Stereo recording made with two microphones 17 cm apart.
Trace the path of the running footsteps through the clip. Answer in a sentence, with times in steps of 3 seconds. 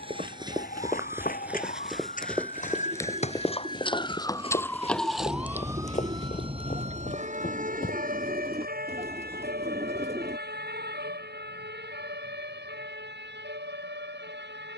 You can hear the running footsteps in the centre from 0 s, on the left from 3 s and not at all from 9 s.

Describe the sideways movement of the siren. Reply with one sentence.
In this clip you hear the siren go from the left side to the right.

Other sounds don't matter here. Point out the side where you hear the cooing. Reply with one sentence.
In this clip you hear the cooing on the right.